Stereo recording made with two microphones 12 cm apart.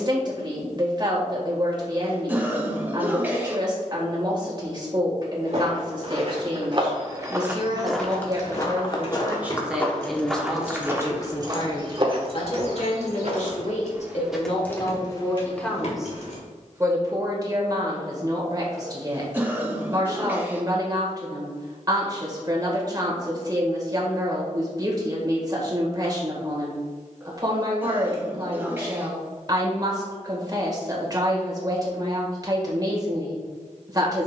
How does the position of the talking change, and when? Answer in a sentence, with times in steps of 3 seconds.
In this clip you hear the talking on the right from 0 s, in the centre from 9 s, on the left from 12 s, in the centre from 15 s and on the right from 18 s.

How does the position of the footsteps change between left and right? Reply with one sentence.
In this clip you hear the footsteps go left and come back.